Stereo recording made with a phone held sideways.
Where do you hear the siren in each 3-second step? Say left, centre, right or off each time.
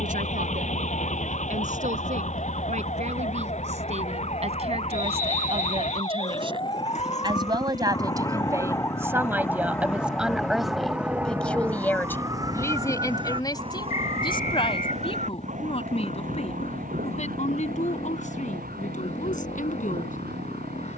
left, left, left, centre, right, right, right.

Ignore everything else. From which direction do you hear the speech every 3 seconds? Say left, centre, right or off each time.
right, right, right, centre, left, left, left.